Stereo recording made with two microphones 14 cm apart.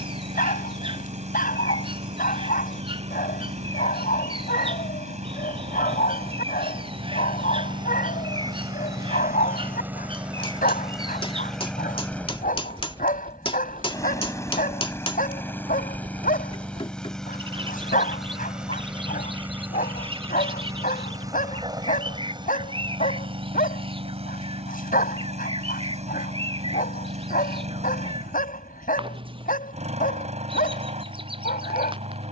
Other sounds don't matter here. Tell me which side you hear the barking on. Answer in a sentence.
You can hear the barking on the left.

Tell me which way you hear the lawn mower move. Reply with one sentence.
You can hear the lawn mower go left and come back.